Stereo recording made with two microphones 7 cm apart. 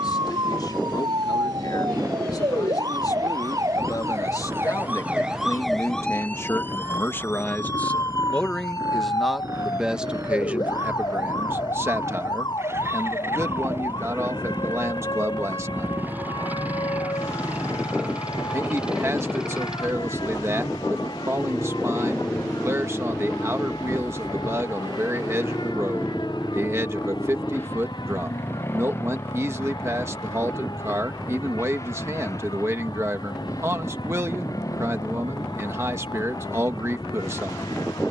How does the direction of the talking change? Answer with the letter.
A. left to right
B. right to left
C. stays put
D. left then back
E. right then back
A.